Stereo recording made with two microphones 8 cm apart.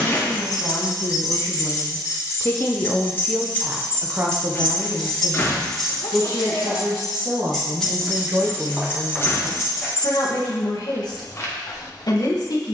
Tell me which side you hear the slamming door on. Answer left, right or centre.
left.